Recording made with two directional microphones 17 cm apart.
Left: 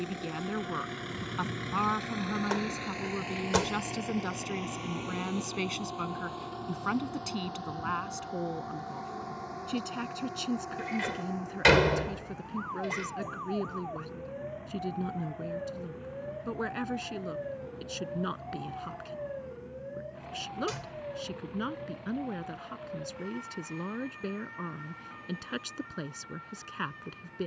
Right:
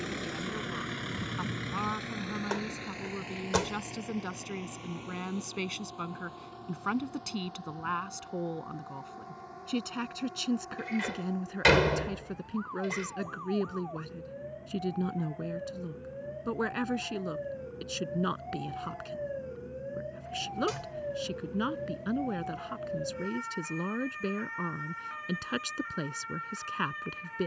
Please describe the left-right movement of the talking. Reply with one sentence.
In this clip you hear the talking travel towards the right.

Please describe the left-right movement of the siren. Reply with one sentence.
In this clip you hear the siren move to the right.